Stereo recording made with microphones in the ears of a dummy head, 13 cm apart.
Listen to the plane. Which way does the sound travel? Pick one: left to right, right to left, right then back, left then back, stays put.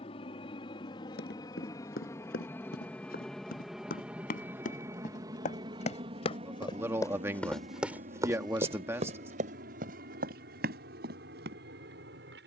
left to right.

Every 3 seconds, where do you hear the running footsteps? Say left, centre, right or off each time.
left, left, centre, right.